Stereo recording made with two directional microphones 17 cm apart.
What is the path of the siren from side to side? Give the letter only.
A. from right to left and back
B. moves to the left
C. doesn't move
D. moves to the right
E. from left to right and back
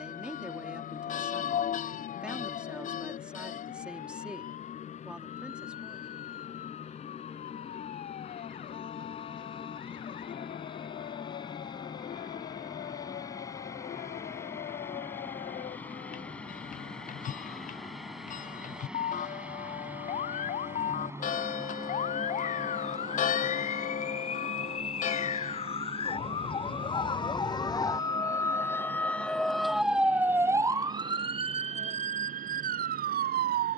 D.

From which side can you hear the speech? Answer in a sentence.
You can hear the speech in the centre.